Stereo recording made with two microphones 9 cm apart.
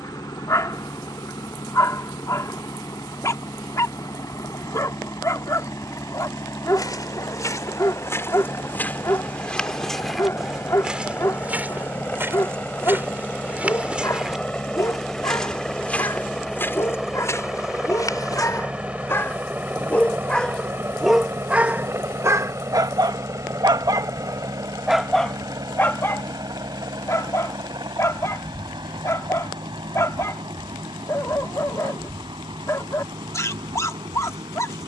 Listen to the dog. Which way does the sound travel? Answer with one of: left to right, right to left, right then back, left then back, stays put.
right then back.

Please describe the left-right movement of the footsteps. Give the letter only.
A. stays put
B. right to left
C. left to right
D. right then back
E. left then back
D.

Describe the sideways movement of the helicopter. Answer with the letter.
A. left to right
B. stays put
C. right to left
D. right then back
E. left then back
A.